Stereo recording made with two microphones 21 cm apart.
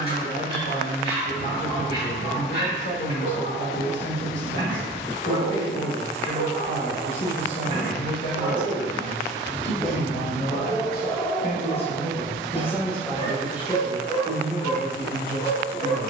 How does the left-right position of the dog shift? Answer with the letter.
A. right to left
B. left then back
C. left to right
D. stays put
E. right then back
A.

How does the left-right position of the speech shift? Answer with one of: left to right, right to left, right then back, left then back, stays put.
left to right.